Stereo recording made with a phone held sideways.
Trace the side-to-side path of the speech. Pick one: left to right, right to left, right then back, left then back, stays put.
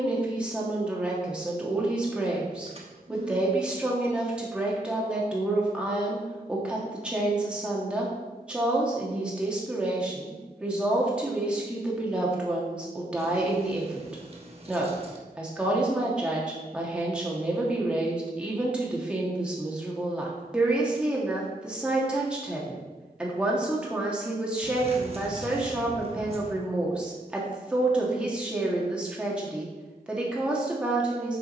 stays put.